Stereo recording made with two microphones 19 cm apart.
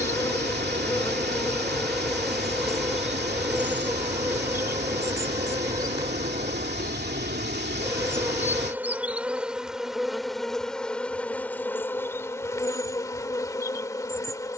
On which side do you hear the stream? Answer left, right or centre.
right.